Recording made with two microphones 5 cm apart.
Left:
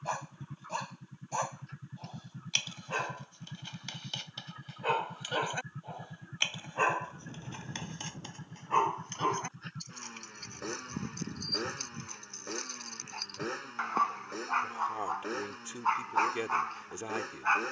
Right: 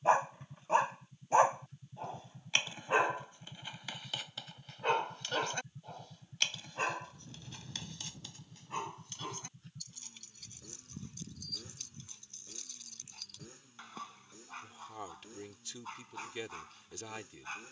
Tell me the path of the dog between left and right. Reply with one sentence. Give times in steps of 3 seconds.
You can hear the dog on the right from 0 s, in the centre from 3 s and on the left from 6 s.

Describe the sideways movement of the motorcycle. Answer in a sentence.
In this clip you hear the motorcycle stay in one place.